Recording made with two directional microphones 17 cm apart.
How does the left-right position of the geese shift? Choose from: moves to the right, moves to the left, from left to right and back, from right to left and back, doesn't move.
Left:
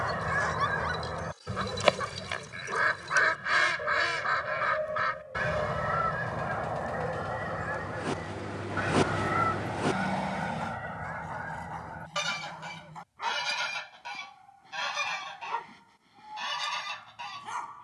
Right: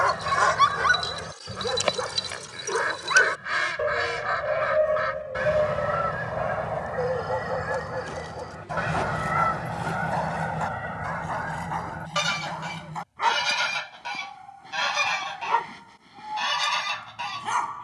moves to the right.